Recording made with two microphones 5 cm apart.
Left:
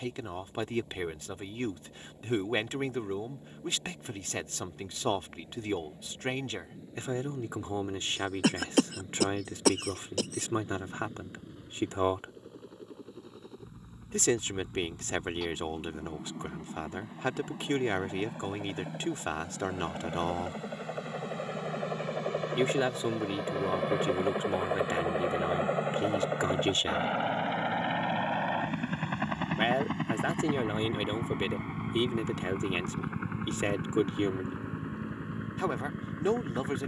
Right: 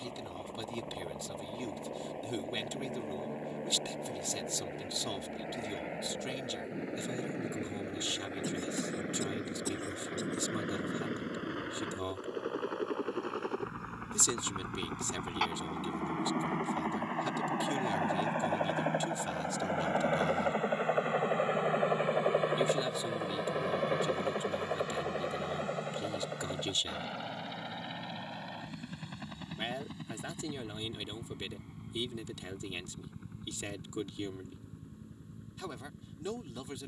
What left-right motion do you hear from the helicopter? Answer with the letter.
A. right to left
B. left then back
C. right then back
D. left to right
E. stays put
A.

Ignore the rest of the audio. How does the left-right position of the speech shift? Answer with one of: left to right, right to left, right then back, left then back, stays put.
stays put.